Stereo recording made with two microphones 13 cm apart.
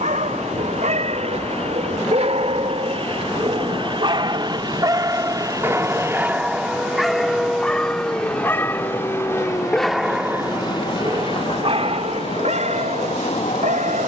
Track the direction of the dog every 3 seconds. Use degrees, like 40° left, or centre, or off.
60° right, 30° right, 10° left, 20° right, 70° right.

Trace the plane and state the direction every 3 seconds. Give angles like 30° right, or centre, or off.
50° right, 40° right, centre, 30° left, 50° left.